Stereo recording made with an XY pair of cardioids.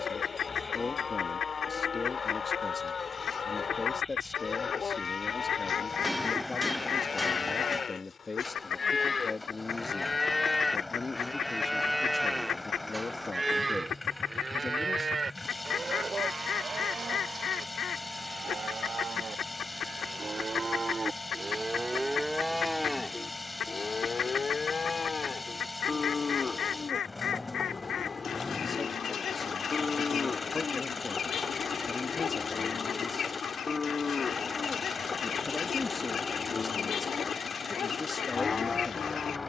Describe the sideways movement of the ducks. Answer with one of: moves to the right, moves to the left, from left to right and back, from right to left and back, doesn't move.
doesn't move.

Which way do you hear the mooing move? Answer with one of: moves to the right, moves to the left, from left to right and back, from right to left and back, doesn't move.
from left to right and back.